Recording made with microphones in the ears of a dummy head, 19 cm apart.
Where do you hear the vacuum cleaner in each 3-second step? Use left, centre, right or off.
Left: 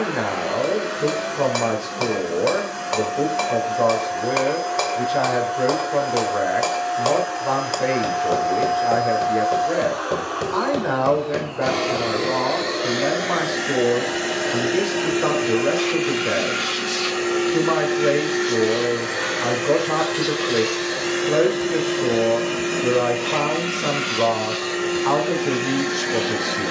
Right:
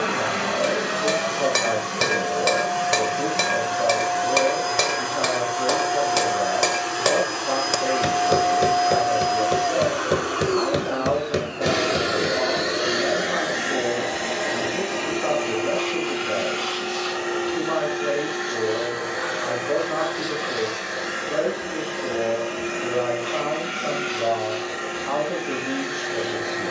right, right, right, right, centre, left, left, left, left.